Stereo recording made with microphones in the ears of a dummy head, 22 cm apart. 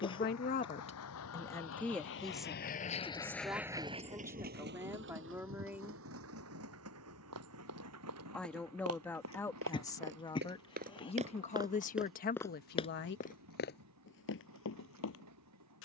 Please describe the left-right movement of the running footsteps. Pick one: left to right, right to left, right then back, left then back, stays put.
right to left.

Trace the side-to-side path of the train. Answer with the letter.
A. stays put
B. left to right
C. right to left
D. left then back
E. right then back
B.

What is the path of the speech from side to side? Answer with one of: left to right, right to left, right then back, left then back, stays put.
right then back.